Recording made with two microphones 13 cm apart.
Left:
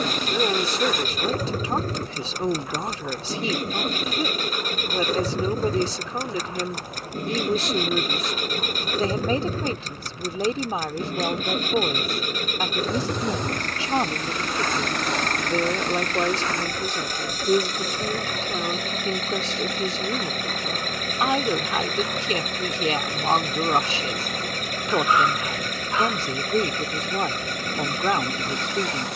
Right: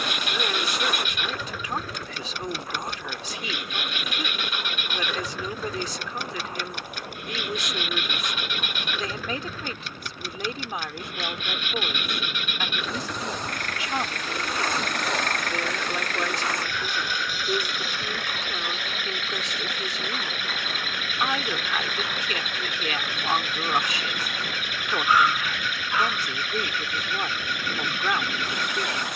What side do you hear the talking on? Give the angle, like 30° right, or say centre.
30° left.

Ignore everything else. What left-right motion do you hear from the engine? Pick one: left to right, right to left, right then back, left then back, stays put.
stays put.